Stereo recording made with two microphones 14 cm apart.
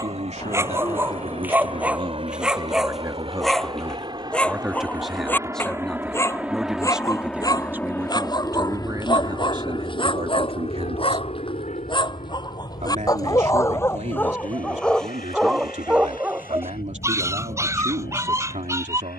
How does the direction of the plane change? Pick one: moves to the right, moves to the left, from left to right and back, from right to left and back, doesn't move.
moves to the left.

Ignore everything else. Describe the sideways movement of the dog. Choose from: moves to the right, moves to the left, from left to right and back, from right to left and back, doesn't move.
from right to left and back.